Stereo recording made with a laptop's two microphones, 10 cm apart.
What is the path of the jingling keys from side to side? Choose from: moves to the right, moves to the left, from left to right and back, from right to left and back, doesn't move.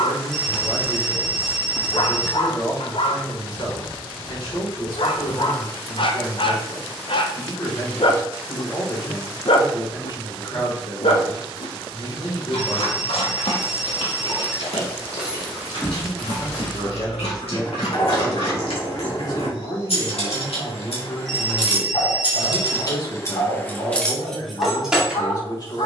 from right to left and back.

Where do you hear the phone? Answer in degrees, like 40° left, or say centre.
centre.